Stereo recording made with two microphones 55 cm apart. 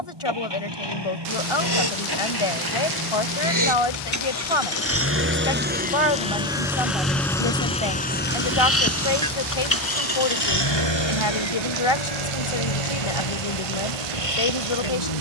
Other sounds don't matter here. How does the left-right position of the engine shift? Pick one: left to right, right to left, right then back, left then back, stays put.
right to left.